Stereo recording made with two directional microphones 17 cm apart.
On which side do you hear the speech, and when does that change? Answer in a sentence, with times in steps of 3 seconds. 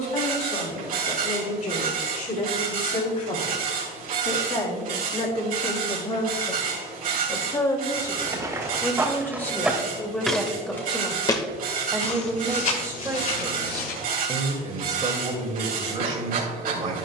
In this clip you hear the speech on the left from 0 s, in the centre from 9 s and on the right from 12 s.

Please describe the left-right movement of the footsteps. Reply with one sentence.
You can hear the footsteps move from right to left.